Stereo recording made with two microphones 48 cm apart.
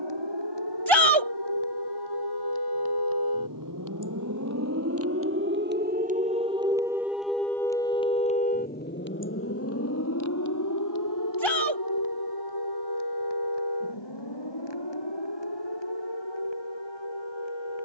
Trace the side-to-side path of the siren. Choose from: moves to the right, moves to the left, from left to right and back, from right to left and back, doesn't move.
moves to the left.